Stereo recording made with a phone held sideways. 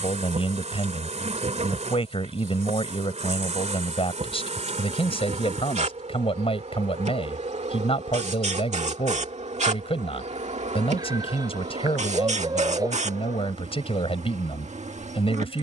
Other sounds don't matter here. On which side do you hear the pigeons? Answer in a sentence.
In this clip you hear the pigeons on the right.